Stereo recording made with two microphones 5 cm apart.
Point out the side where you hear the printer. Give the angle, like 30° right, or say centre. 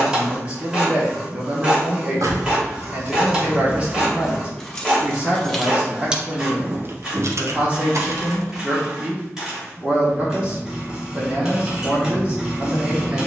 10° right.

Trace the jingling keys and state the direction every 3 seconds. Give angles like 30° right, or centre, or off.
70° right, 10° right, 60° right, off, off.